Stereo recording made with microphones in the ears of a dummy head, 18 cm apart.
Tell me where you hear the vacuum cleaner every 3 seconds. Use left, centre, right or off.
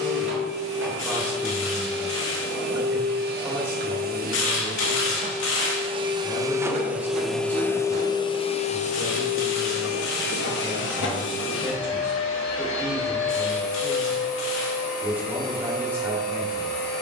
right, right, centre, left, left, left.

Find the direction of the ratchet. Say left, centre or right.
left.